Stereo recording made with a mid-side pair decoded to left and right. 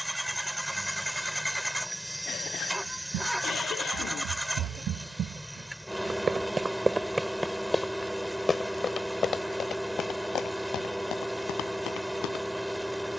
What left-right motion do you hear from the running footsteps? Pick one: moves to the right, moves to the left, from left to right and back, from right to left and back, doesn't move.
moves to the left.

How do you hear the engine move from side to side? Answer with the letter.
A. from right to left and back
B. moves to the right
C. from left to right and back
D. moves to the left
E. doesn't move
E.